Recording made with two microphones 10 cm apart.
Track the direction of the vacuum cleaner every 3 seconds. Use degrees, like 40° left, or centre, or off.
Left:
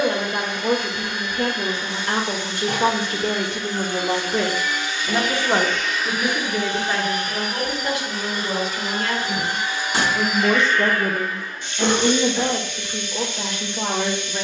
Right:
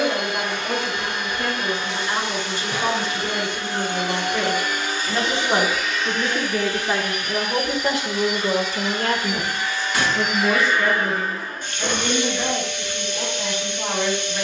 70° right, 50° right, 30° left, 10° right, 70° right.